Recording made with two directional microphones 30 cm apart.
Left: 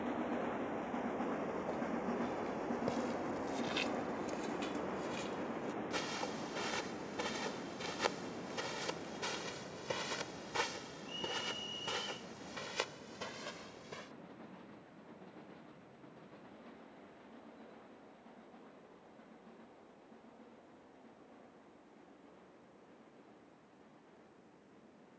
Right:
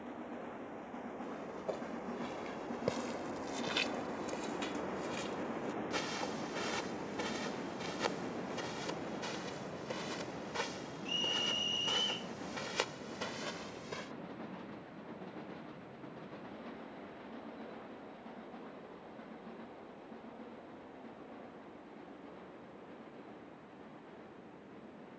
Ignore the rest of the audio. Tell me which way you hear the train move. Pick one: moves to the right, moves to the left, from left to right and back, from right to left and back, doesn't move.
moves to the right.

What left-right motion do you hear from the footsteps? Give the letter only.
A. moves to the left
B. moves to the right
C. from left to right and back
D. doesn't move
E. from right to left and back
E.